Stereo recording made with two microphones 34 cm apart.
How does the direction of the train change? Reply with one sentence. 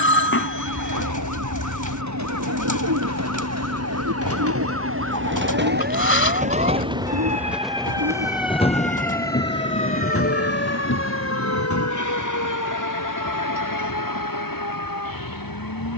In this clip you hear the train move to the left.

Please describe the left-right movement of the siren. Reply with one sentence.
In this clip you hear the siren move from right to left.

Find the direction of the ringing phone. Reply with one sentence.
In this clip you hear the ringing phone on the left.